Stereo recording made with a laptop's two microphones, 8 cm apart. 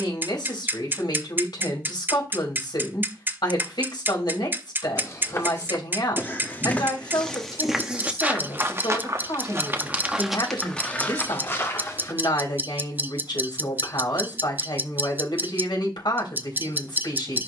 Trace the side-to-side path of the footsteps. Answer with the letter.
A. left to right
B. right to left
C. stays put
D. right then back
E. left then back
D.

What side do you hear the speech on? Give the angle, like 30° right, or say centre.
80° left.